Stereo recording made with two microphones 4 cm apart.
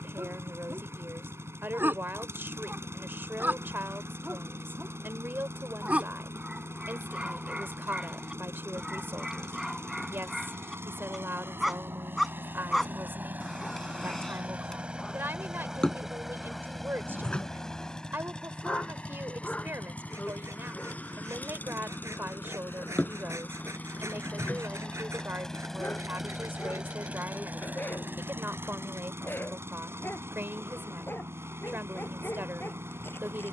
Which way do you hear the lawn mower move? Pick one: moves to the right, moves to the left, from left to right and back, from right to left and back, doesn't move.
from right to left and back.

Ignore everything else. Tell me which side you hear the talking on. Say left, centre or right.
right.